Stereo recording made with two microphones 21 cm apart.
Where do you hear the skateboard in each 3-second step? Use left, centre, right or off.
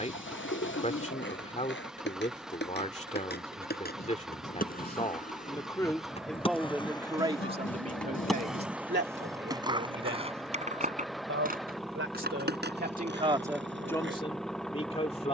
left, left, centre, right, right.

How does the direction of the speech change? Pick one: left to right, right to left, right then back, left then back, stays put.
right then back.